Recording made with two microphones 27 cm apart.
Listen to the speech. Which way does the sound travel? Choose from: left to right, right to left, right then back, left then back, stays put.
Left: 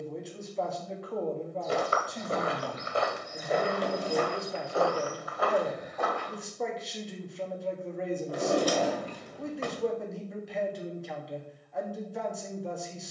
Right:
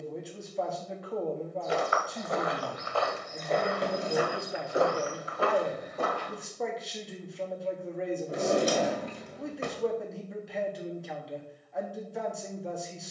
stays put.